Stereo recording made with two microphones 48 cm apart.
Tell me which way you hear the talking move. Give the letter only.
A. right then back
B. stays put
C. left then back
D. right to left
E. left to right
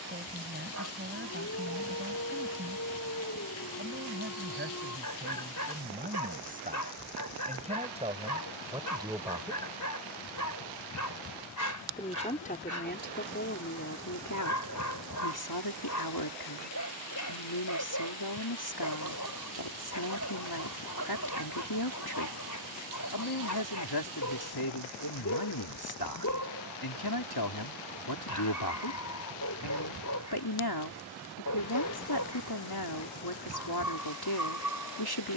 D.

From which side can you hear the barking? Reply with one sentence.
You can hear the barking on the left.